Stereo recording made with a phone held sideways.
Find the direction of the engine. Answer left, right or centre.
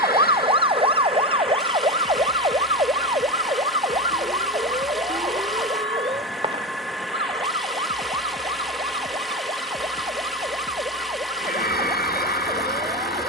centre.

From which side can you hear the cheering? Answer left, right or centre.
left.